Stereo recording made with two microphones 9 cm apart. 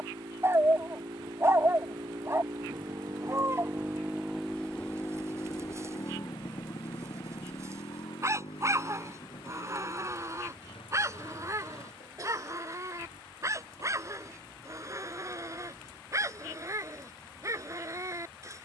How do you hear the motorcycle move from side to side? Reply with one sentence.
You can hear the motorcycle move from right to left.